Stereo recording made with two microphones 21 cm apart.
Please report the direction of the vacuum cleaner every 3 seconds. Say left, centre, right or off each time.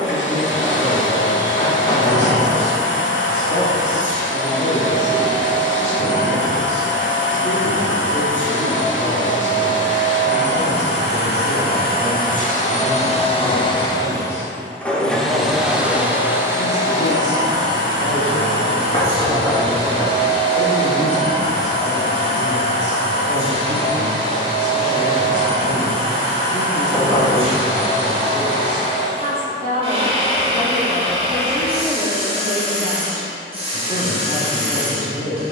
left, left, left, left, left, centre, right, right, right, right, right, right.